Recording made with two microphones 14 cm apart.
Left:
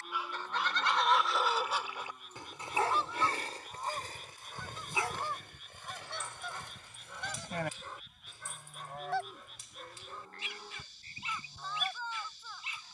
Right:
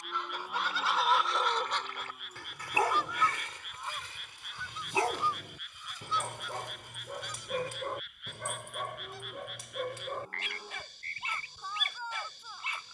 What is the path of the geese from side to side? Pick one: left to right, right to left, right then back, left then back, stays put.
right to left.